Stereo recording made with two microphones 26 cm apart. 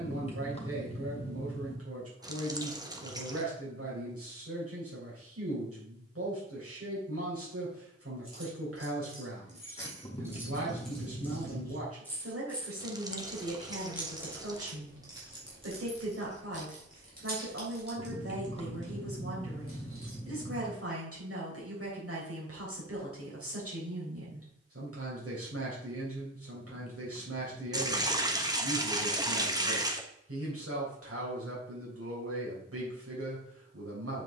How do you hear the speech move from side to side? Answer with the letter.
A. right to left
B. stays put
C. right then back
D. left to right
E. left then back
B.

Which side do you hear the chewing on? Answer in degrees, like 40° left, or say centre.
20° left.